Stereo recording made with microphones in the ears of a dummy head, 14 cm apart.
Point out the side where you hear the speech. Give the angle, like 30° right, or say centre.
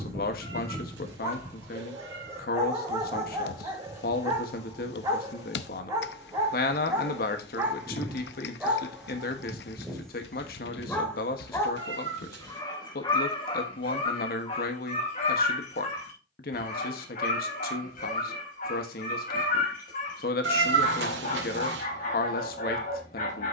60° left.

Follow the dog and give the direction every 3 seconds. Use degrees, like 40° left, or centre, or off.
20° right, 20° right, 20° right, 10° left, 30° left, 50° left, 60° left, 60° left.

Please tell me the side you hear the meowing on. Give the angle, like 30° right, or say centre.
90° right.